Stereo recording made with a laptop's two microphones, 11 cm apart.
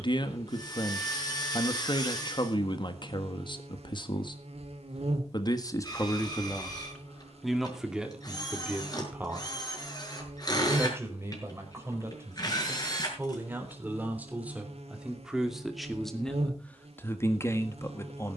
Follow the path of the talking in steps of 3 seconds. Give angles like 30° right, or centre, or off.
40° left, 40° left, centre, 20° right, 20° right, 10° left.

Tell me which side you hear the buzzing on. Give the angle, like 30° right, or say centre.
70° right.